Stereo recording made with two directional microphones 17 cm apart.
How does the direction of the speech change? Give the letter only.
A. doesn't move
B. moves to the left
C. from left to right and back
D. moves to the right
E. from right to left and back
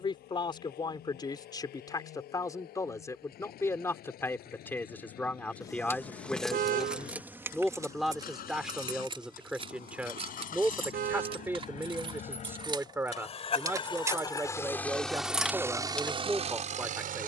D.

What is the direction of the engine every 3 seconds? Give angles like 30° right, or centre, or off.
70° left, 70° left, 60° left, 60° left, 30° left, 30° right.